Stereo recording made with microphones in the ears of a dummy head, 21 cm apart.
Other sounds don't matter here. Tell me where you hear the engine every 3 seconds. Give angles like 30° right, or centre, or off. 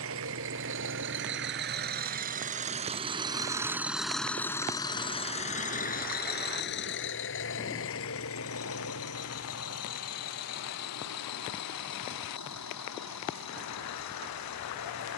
40° right, 10° left, 50° left, 70° left, 70° left.